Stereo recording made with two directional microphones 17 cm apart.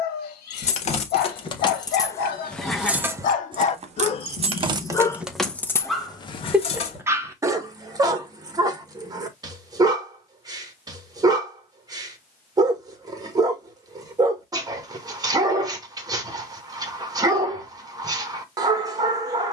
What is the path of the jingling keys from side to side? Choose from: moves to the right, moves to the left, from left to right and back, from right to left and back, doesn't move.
from left to right and back.